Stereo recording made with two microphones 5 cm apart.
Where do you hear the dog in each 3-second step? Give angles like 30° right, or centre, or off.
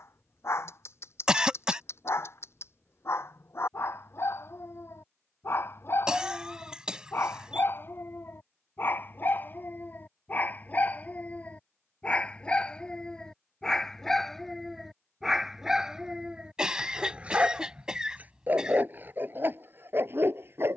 60° left, 50° left, 50° left, 30° left, 10° left, 20° right, 40° right.